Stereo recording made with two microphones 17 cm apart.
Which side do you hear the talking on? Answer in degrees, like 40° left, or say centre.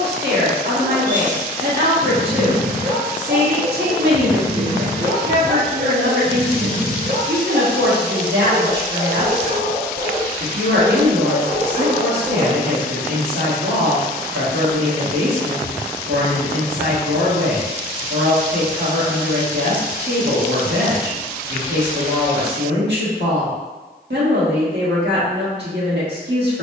80° right.